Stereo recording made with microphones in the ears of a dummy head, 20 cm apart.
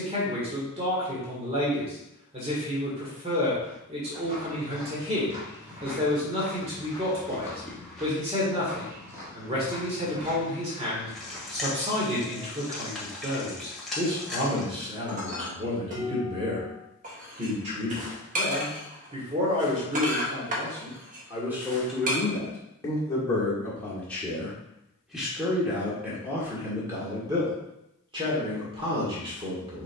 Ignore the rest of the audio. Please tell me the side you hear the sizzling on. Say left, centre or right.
centre.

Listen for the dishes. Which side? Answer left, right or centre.
right.